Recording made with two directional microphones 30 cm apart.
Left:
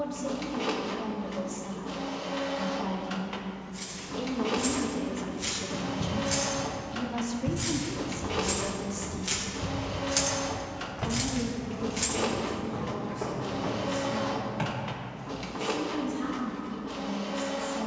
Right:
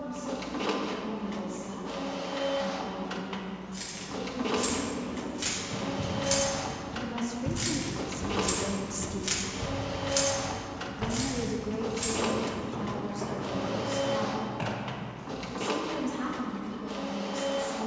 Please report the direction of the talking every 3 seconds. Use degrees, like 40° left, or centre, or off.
60° left, 50° left, centre, 40° right, 60° right, 70° right.